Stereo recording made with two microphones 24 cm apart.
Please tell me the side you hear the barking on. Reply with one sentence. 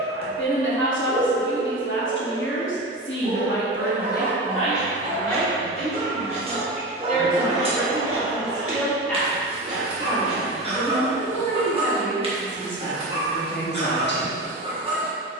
In this clip you hear the barking on the right.